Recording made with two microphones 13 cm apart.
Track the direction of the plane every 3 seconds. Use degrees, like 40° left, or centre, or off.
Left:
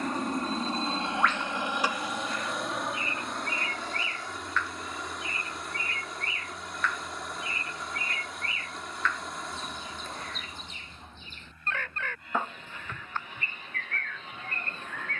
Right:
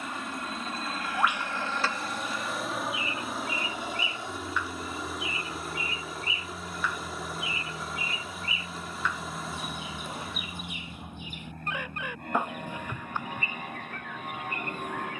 20° left, 20° right, 40° right, 40° right, 50° right.